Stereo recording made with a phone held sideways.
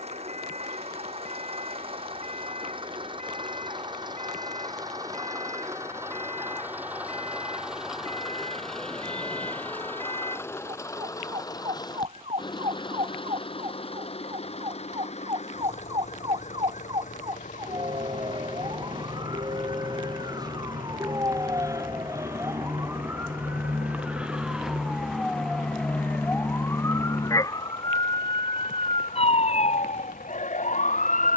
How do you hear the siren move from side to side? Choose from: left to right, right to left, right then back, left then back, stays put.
right to left.